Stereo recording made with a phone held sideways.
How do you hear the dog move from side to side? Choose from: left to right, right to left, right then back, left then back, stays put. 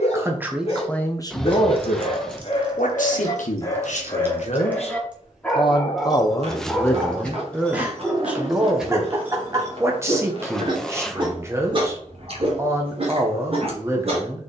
left to right.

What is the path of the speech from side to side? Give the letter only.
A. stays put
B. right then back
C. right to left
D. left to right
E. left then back
E.